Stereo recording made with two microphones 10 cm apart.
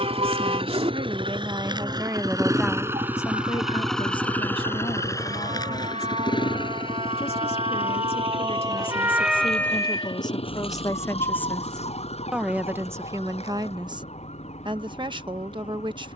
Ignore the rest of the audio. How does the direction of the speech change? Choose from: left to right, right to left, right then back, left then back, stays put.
left then back.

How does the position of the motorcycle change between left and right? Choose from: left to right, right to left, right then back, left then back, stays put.
right to left.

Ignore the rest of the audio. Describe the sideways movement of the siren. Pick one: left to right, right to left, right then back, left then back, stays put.
right to left.